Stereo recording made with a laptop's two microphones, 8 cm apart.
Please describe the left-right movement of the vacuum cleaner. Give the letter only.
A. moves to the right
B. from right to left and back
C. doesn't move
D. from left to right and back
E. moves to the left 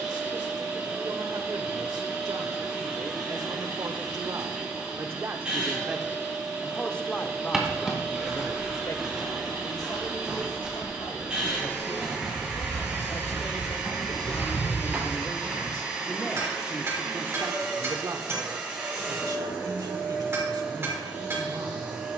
C.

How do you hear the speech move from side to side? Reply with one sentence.
In this clip you hear the speech go left and come back.